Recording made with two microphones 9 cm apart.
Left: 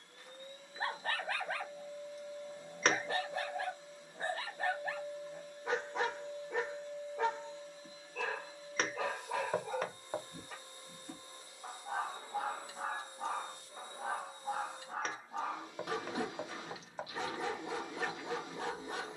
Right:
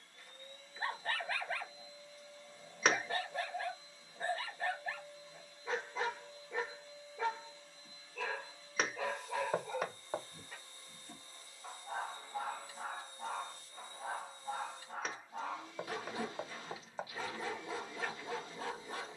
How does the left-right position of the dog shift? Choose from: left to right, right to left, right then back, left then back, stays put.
stays put.